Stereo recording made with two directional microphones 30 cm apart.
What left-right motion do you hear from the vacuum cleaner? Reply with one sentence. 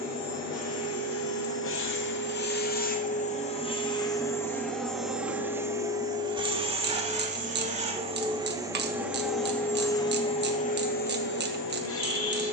You can hear the vacuum cleaner go right and come back.